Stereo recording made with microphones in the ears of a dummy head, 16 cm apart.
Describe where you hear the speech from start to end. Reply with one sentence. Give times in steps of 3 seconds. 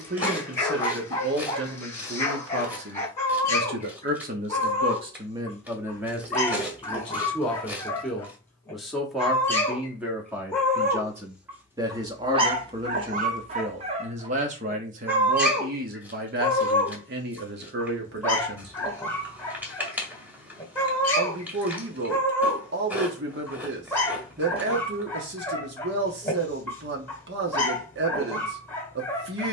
In this clip you hear the speech on the right from 0 s, in the centre from 6 s and on the right from 12 s.